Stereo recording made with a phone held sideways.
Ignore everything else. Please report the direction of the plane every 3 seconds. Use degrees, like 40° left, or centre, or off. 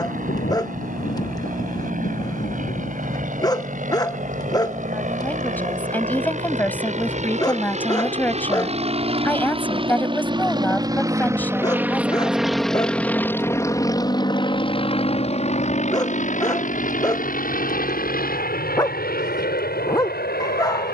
70° right, 60° right, 50° right, 30° right, 20° left, 50° left, 70° left.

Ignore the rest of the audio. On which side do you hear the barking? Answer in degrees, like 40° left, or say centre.
20° left.